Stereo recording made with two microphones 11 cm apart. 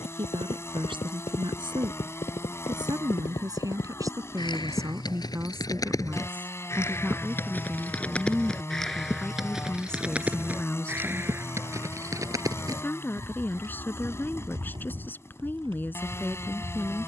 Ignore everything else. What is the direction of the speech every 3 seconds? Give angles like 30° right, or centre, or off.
50° right, 30° right, 10° right, 10° left, 20° left, 20° left.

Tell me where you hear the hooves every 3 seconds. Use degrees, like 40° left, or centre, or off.
60° left, 40° left, 10° left, 10° right, 40° right, 50° right.